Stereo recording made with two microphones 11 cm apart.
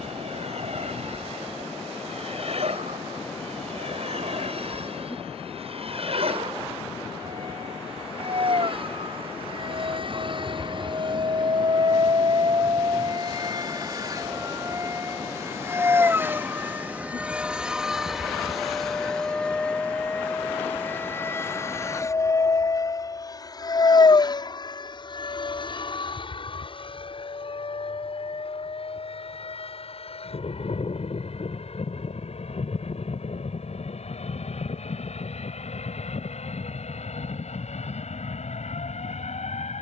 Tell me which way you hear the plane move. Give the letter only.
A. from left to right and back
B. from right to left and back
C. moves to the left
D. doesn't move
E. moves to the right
C.